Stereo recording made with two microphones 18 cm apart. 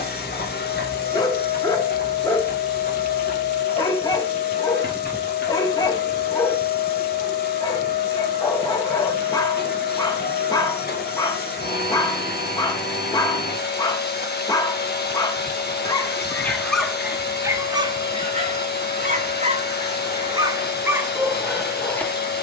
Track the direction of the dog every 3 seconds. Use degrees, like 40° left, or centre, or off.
20° left, 20° left, 20° left, 20° left, 20° left, centre, 30° right, centre.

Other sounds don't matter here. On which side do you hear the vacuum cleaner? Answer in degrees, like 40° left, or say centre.
60° left.